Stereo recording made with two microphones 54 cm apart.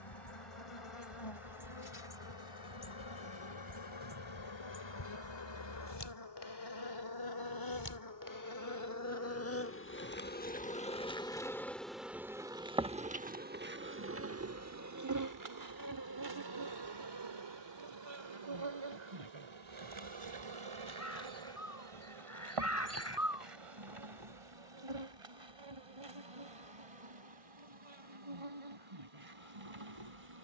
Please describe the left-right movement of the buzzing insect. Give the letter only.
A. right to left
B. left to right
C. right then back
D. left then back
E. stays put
B.